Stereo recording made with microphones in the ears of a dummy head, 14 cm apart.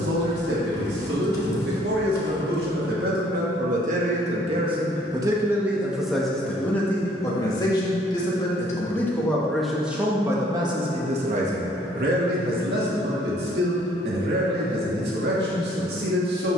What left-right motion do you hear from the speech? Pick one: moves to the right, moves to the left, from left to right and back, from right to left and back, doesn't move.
from right to left and back.